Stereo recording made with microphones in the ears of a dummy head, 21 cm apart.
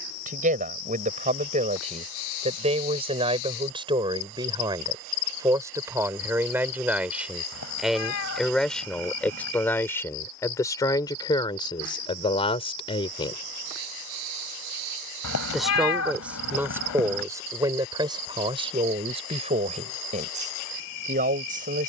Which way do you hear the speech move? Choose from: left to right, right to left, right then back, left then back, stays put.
left then back.